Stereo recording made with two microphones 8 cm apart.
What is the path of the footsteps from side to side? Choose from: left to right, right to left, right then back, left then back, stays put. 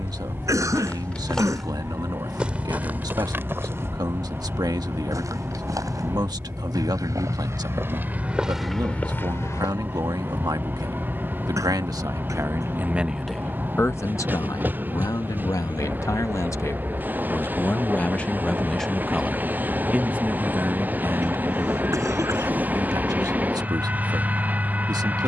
right then back.